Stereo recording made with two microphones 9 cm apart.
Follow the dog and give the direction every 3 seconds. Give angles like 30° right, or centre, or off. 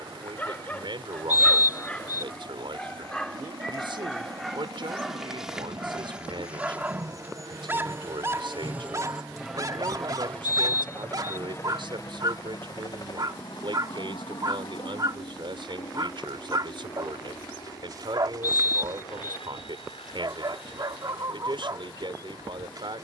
20° left, centre, 20° right, 40° right, 50° right, 50° right, 50° right, 50° right.